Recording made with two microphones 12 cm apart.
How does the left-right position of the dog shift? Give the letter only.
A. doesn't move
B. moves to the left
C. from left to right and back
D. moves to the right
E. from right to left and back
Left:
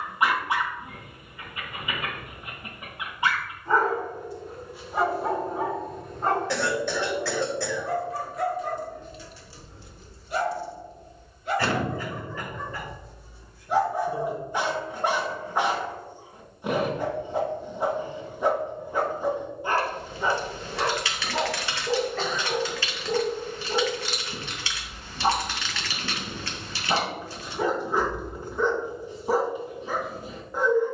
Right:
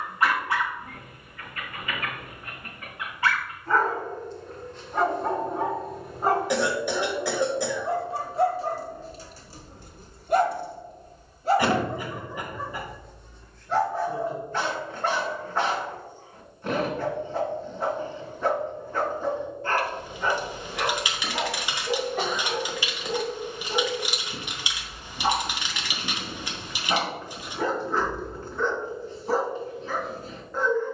C.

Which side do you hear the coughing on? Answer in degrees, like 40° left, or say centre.
10° right.